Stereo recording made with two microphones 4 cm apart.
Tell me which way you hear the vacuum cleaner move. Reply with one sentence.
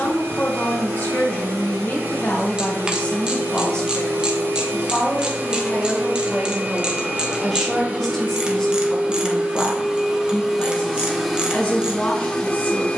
You can hear the vacuum cleaner move to the left.